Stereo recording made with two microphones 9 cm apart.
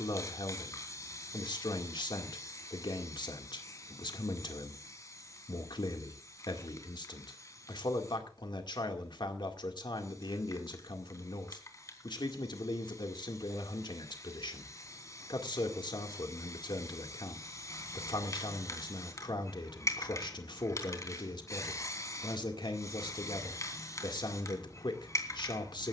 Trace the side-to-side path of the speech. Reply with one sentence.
In this clip you hear the speech stay put.